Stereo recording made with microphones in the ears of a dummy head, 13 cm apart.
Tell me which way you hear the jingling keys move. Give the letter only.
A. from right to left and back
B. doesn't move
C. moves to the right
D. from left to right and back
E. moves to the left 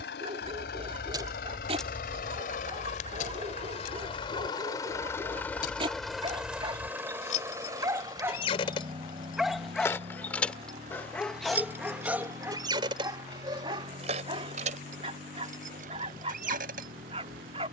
A.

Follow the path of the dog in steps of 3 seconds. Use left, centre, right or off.
right, right, right, centre, right, right.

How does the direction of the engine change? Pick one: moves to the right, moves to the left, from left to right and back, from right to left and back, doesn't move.
moves to the right.